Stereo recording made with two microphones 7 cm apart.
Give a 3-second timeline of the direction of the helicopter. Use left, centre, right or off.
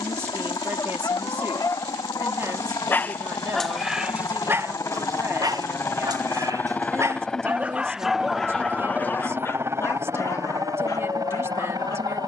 left, left, centre, right.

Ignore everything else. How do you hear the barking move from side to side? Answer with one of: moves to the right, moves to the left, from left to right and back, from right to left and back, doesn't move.
from left to right and back.